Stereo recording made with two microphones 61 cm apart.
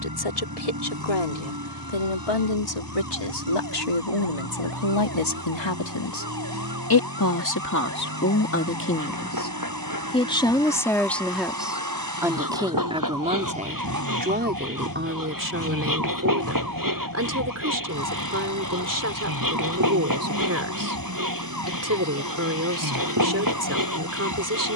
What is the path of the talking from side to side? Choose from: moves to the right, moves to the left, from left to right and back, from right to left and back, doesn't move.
moves to the right.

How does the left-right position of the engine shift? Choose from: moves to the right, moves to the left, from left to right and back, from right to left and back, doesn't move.
doesn't move.